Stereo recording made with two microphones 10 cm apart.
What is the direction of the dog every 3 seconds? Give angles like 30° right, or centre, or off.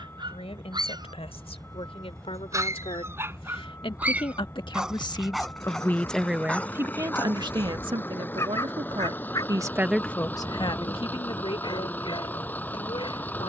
40° right, 10° right, 20° left, 40° left, 50° left.